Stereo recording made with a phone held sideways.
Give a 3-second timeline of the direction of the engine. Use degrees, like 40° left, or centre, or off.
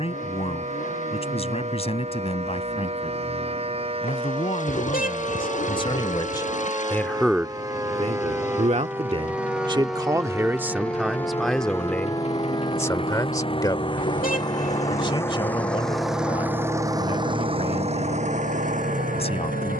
60° left, 60° left, 60° left, 50° left, 40° left, 10° right, 60° right.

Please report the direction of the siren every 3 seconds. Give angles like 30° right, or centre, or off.
50° right, 40° right, 30° right, centre, 40° left, 60° left, 70° left.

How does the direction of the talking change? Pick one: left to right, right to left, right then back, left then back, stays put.
right then back.